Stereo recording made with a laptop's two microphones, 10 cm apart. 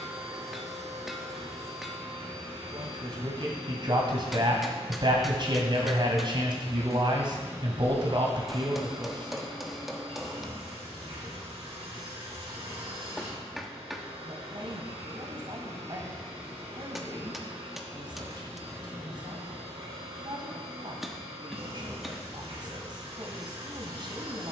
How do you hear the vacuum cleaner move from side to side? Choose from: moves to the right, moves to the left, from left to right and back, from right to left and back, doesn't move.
doesn't move.